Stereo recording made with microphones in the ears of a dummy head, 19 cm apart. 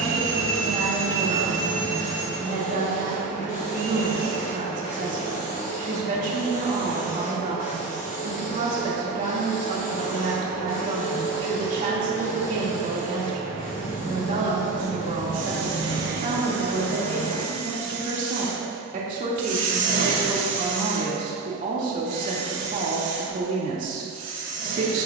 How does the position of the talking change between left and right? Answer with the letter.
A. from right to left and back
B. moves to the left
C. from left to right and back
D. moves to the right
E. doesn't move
E.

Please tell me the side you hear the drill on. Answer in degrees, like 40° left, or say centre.
40° right.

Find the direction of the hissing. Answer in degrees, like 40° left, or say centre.
40° left.